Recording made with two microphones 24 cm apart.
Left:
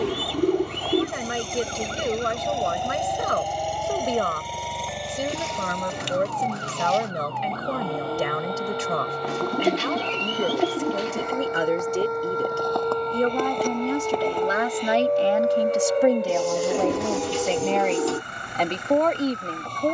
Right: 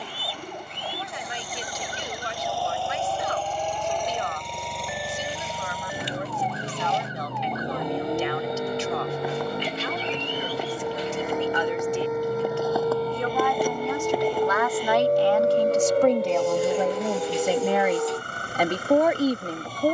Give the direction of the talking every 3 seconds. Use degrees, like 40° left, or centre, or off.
60° left, 60° left, 60° left, 50° left, 40° left, centre, 10° right.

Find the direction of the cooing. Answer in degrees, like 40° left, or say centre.
80° left.